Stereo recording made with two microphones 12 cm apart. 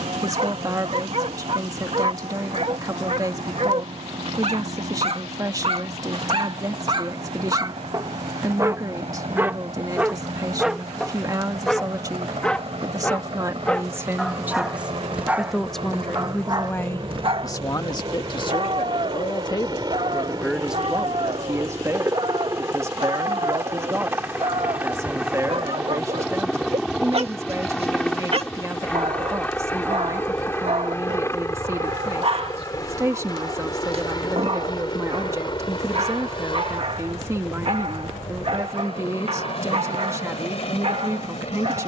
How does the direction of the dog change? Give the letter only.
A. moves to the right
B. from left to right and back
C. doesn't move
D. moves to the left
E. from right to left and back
E.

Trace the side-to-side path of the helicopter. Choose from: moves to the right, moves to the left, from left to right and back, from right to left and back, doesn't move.
moves to the left.